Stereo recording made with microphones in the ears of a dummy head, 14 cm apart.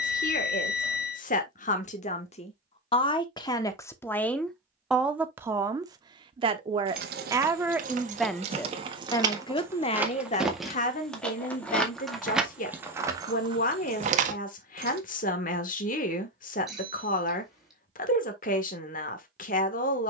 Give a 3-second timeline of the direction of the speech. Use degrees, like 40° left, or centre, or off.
50° left, 10° left, 10° right, 40° left, 50° left, 50° left, 50° left.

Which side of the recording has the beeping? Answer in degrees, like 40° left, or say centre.
centre.